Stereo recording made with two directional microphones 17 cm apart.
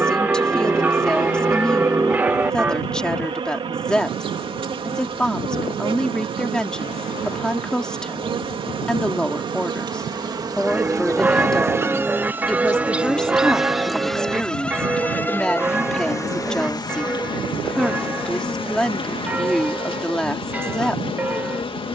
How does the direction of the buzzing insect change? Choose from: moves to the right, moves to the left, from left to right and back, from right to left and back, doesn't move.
moves to the left.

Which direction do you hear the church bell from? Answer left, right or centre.
centre.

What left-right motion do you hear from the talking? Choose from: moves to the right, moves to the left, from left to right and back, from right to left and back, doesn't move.
doesn't move.